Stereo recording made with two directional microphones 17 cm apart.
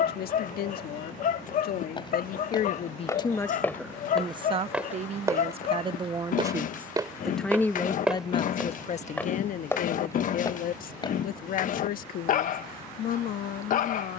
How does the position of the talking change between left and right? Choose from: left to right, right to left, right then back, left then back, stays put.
right then back.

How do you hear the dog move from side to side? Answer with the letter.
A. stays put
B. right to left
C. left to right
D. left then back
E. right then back
A.